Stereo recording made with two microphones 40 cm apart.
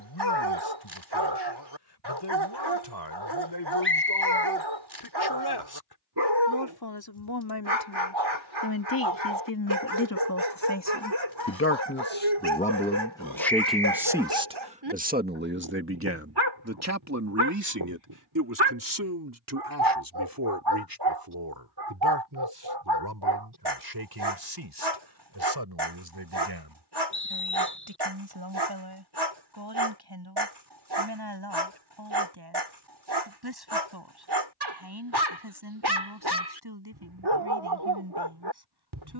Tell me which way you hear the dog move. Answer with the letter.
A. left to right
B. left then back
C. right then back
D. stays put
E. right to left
D.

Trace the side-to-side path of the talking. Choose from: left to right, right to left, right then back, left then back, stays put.
left to right.